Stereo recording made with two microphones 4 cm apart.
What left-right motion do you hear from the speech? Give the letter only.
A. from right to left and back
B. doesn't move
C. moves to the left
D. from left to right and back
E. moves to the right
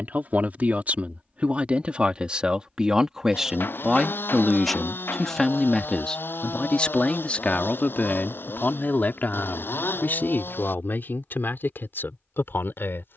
C.